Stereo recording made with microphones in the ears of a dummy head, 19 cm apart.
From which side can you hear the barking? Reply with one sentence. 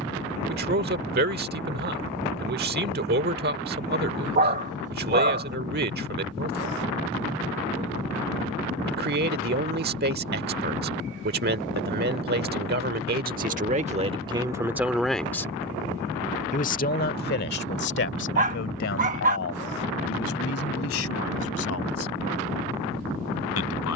In this clip you hear the barking on the right.